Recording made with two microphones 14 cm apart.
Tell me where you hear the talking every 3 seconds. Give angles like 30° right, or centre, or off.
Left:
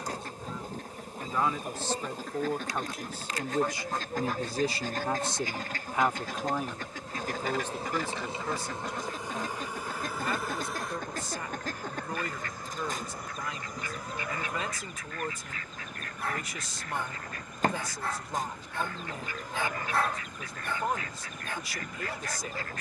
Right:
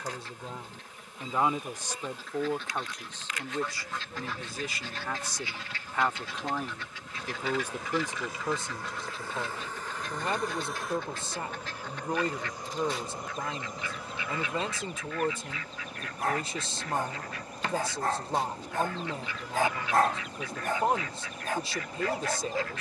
20° right, 20° left, 10° right, 30° right, 30° right, 30° right, 30° right, 30° right.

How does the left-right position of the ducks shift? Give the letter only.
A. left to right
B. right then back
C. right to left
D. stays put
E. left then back
D.